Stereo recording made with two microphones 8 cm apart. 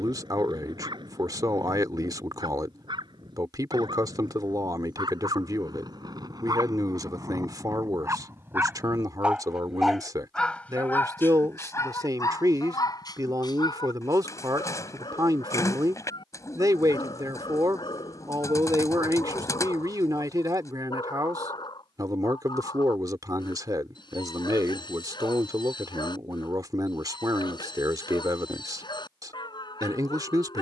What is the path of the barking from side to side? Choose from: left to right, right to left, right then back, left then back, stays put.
right to left.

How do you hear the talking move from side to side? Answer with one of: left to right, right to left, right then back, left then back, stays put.
stays put.